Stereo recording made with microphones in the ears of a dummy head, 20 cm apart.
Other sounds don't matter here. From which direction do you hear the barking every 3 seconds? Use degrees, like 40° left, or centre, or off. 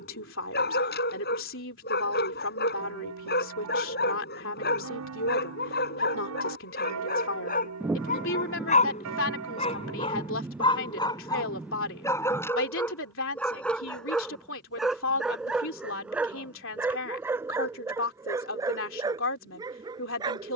50° left, 50° left, 40° left, 20° left, 10° left, 10° right, 20° right.